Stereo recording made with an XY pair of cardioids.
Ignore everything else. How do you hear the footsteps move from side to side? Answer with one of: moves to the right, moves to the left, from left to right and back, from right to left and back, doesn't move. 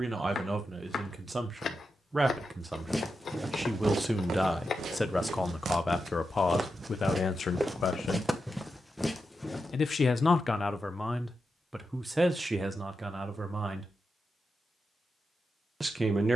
from left to right and back.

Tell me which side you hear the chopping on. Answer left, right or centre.
left.